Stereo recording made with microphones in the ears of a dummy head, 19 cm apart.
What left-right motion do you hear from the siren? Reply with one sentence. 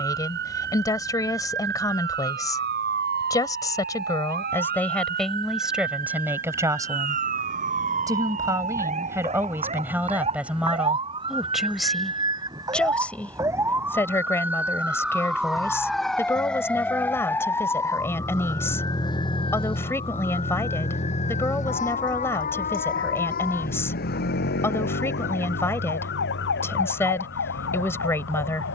You can hear the siren move to the left.